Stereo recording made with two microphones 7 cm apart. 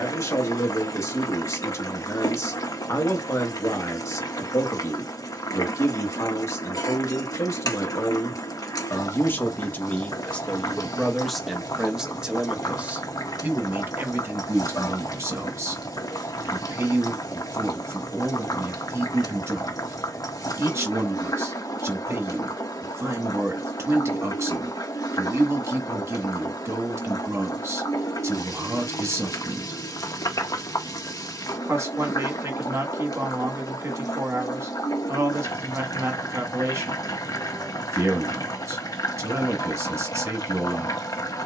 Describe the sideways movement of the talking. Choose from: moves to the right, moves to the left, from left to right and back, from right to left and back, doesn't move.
moves to the right.